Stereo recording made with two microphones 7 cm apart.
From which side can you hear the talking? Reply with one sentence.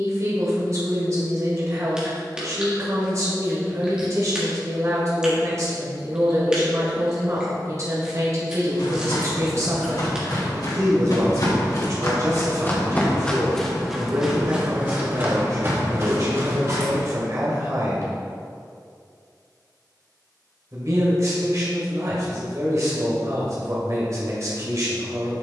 You can hear the talking on the right.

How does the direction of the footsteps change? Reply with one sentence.
You can hear the footsteps travel towards the right.